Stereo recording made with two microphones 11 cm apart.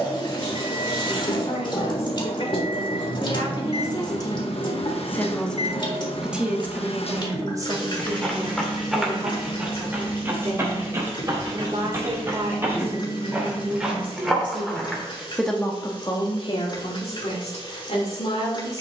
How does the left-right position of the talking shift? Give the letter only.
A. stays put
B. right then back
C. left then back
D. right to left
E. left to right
B.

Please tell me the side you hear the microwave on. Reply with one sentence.
In this clip you hear the microwave on the left.